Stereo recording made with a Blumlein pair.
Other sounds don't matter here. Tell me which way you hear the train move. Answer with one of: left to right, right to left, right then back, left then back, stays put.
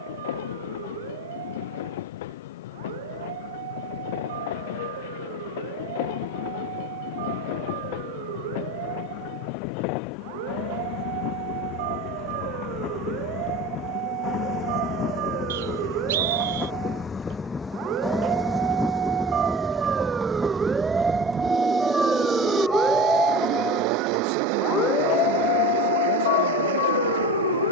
left to right.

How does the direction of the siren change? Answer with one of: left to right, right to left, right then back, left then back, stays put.
right to left.